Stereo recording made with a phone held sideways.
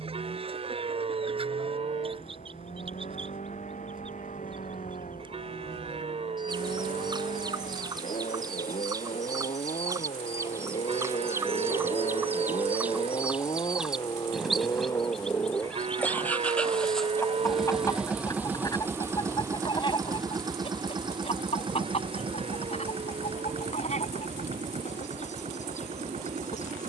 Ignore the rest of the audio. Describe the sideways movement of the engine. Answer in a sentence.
In this clip you hear the engine go from the left side to the right.